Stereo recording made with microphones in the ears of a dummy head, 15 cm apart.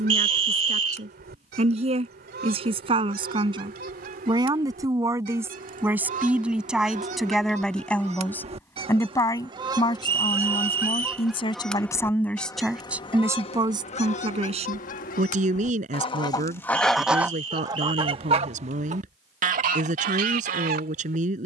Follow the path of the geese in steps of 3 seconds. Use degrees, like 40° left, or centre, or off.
60° right, 60° right, 40° right, 10° right, 30° left, 20° left, 50° right.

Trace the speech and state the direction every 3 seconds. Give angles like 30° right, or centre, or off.
40° right, 20° right, centre, 30° left, 20° right, 40° right, 40° right.